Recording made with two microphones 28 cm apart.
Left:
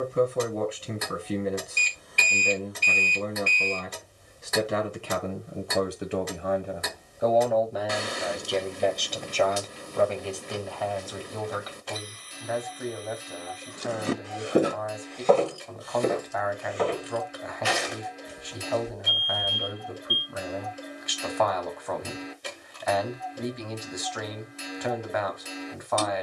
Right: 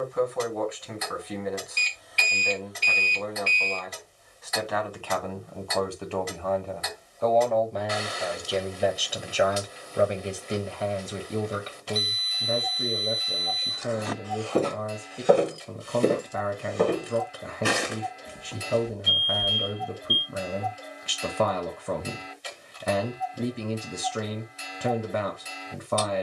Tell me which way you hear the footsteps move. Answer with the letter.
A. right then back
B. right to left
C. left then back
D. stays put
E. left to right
E.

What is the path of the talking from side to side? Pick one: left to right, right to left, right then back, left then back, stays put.
left to right.